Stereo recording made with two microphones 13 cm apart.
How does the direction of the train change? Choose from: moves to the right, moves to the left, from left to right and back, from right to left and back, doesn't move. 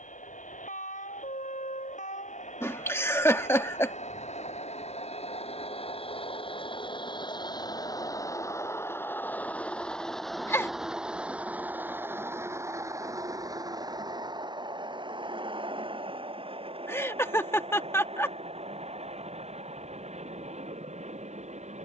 moves to the right.